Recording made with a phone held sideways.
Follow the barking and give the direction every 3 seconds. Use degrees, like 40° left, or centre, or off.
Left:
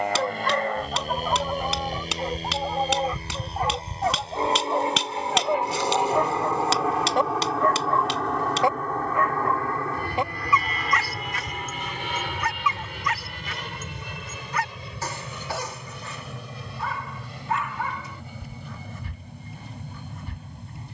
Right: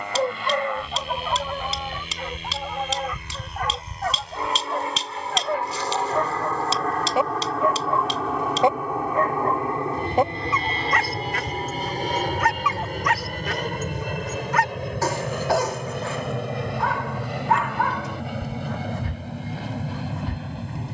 10° left, 20° left, 10° right, 50° right, 70° right, 70° right, 70° right.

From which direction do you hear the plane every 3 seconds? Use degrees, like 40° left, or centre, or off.
40° left, 30° left, centre, 30° right, 50° right, 60° right, 70° right.